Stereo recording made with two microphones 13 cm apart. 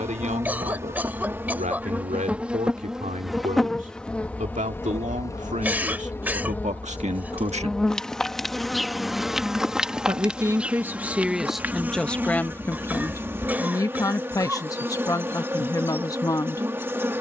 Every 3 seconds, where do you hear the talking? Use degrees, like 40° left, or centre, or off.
80° right, 70° right, 60° right, 10° right, 20° left, 30° left.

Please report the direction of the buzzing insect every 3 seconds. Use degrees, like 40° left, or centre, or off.
10° right, 10° left, 10° left, 10° right, 20° right, 20° right.